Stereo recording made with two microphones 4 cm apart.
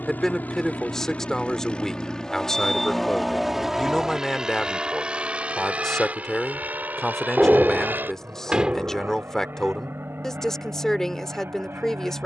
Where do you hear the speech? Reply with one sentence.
In this clip you hear the speech in the centre.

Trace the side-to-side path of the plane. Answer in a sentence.
You can hear the plane travel towards the right.